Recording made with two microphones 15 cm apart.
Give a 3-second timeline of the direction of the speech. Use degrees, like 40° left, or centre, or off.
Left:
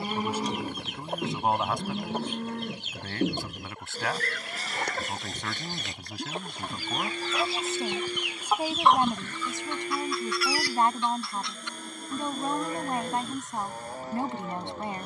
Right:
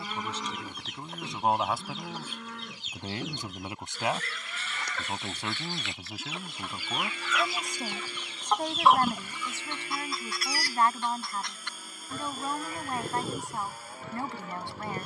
centre, 10° right, centre, 20° left, 20° left.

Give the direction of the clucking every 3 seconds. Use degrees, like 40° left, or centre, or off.
60° left, 60° left, 30° left, 30° right, 70° right.